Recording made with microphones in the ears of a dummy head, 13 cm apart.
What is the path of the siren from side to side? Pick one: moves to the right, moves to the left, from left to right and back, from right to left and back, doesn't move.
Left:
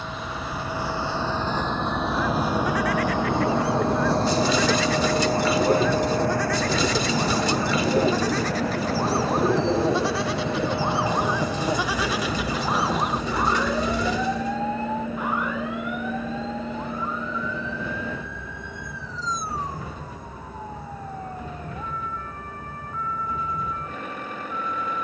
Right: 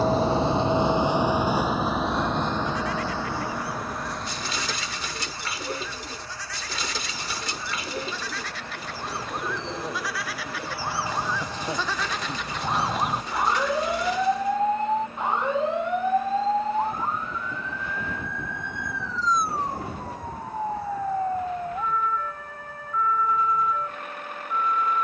moves to the right.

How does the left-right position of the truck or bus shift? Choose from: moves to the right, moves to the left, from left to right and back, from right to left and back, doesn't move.
moves to the left.